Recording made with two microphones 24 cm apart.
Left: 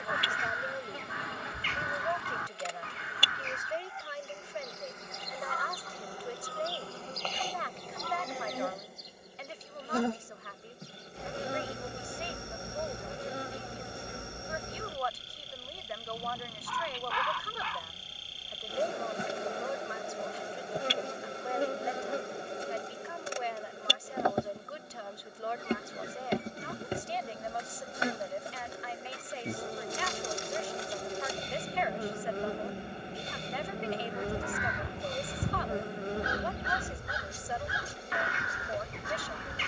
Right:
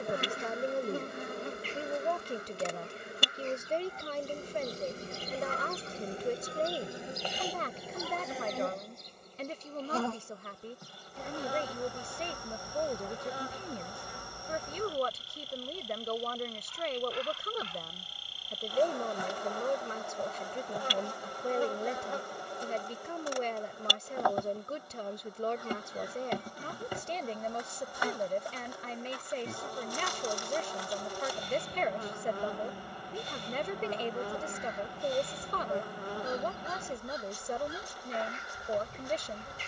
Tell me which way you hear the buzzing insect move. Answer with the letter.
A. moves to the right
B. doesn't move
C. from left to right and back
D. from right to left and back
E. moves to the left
E.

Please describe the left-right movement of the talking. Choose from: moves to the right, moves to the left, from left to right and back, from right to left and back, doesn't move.
doesn't move.